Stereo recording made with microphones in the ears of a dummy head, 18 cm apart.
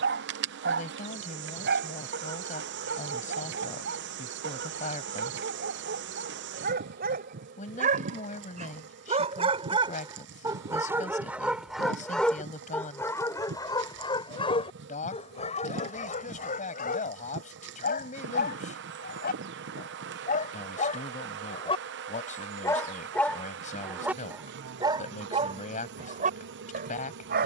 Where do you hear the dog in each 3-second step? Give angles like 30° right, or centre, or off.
60° right, 60° right, 50° right, 20° right, 20° left, 40° left, 50° left, 10° left, 30° right.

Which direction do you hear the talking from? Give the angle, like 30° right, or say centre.
40° left.